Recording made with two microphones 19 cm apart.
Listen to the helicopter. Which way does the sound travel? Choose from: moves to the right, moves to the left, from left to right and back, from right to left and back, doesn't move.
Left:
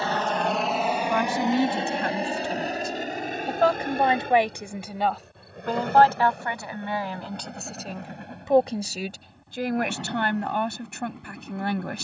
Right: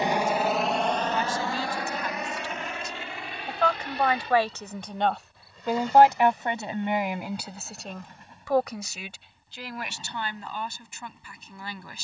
moves to the left.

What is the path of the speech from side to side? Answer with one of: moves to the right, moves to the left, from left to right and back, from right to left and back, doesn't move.
from left to right and back.